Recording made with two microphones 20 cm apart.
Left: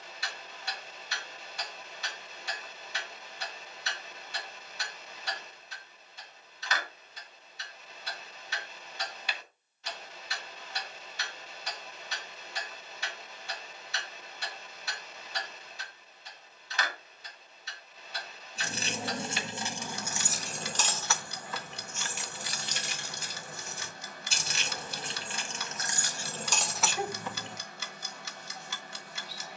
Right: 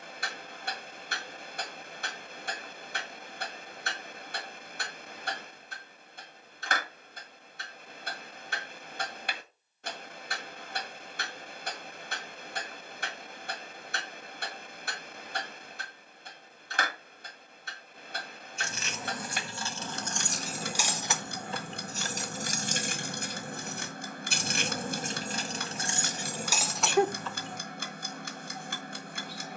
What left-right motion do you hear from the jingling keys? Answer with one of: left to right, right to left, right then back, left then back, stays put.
right then back.